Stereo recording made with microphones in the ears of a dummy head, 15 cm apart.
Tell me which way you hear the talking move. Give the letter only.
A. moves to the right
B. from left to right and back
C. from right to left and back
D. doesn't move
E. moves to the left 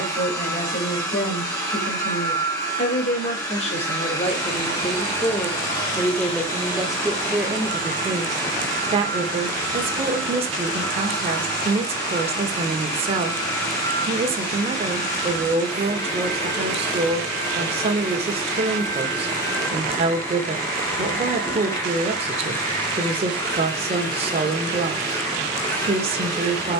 A.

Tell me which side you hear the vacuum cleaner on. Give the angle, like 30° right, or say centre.
20° left.